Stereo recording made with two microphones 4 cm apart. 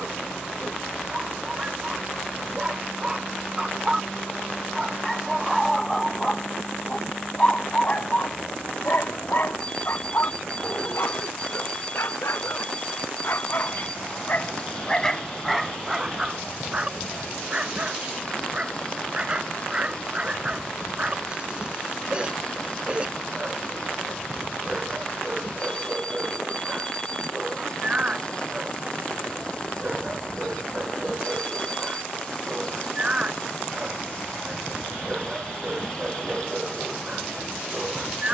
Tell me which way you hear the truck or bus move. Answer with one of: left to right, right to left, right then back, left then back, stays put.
stays put.